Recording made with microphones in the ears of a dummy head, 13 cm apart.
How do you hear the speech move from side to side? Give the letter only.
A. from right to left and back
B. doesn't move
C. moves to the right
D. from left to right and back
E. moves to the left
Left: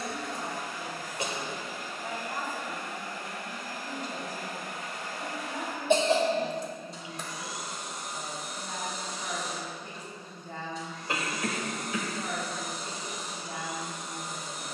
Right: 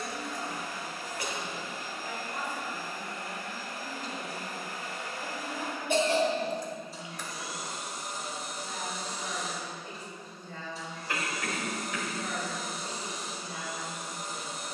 B.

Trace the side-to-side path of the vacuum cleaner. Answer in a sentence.
In this clip you hear the vacuum cleaner stay in one place.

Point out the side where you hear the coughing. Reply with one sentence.
You can hear the coughing on the left.